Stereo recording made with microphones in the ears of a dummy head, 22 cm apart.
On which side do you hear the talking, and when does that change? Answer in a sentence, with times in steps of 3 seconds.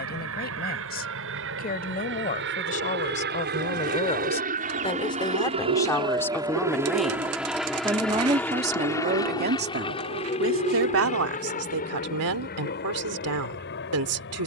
You can hear the talking on the left from 0 s, in the centre from 6 s and on the right from 9 s.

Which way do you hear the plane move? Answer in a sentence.
In this clip you hear the plane move from right to left.